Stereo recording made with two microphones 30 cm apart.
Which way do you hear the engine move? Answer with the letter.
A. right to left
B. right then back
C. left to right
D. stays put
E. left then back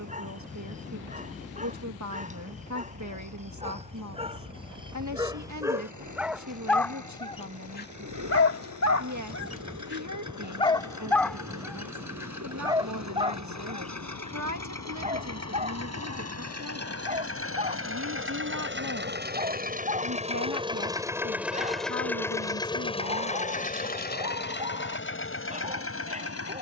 A.